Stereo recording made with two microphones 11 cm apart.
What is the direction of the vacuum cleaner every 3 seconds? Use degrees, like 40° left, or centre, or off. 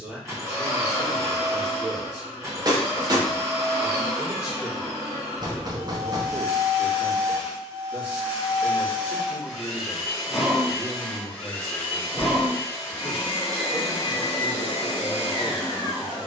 30° right, 30° right, 20° right, centre, 30° left, 50° left.